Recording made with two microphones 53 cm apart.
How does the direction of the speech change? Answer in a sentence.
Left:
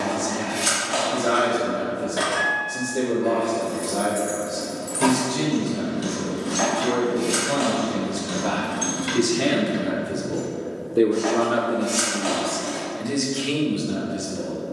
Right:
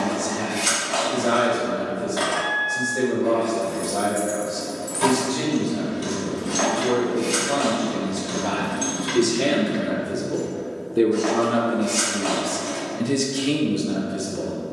You can hear the speech move from left to right.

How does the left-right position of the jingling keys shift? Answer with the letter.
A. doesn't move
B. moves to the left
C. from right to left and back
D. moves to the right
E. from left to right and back
E.